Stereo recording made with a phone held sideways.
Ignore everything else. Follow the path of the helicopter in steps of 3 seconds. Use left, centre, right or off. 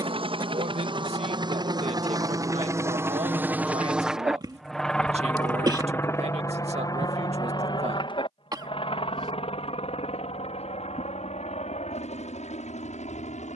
right, centre, left, left, left.